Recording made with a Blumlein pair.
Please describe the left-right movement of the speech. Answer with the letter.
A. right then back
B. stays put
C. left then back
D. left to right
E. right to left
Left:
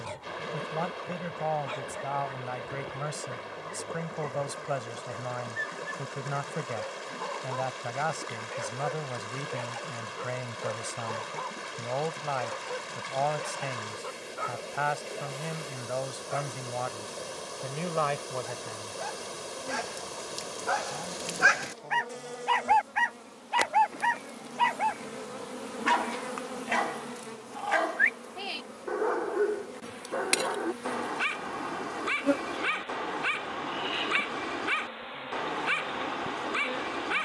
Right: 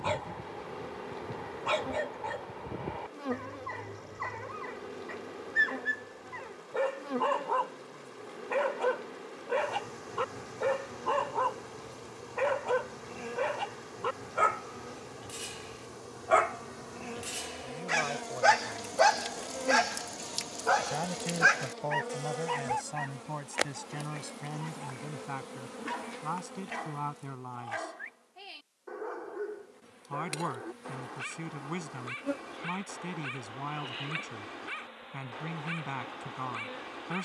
D.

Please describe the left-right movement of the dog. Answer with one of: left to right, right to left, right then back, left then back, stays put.
right to left.